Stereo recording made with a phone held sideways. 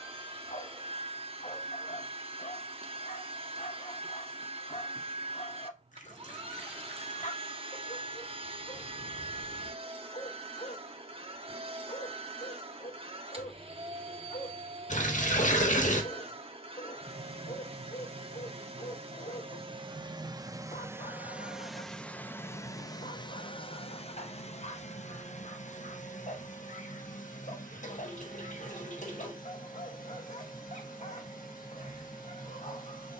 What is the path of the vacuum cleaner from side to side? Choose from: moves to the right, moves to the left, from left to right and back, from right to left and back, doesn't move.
moves to the left.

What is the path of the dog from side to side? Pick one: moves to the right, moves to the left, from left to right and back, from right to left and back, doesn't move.
doesn't move.